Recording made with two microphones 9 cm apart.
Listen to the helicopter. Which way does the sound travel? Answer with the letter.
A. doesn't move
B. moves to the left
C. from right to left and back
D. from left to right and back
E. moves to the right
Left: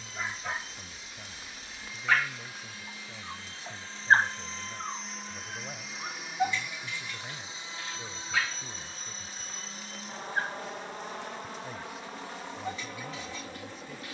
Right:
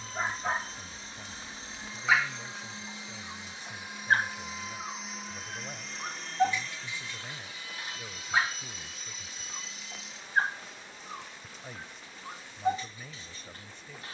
B.